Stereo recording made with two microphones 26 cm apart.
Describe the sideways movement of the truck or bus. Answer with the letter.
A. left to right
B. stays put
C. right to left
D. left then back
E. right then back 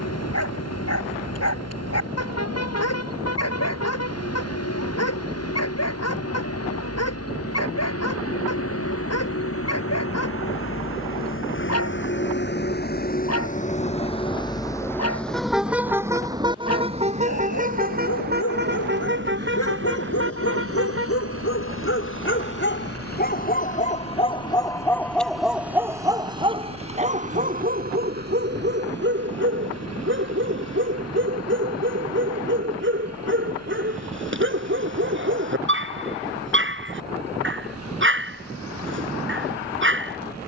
A.